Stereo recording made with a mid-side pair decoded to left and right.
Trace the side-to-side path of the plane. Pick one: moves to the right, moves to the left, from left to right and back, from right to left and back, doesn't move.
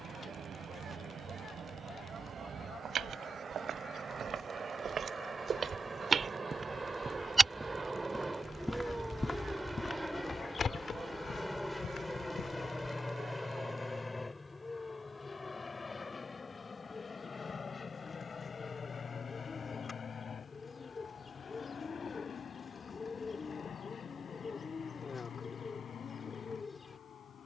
moves to the left.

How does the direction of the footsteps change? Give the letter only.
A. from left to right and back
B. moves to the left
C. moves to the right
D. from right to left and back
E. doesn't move
B.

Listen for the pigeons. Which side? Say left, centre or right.
left.